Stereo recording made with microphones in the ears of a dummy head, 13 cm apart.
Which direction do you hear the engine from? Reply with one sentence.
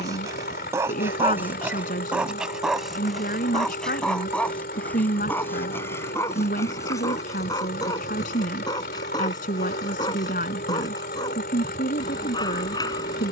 You can hear the engine on the left.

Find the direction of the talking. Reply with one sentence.
You can hear the talking on the left.